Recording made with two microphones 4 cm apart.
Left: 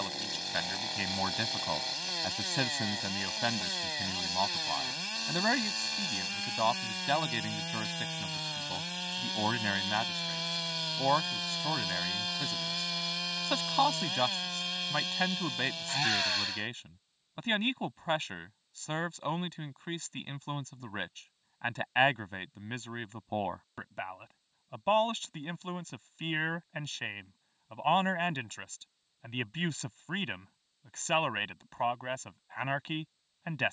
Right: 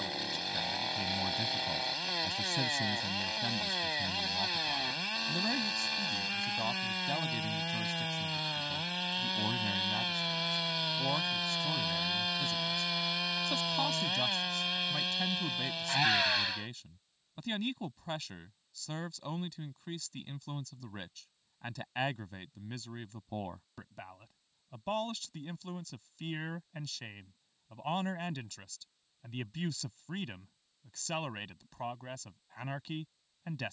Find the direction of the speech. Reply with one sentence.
In this clip you hear the speech on the left.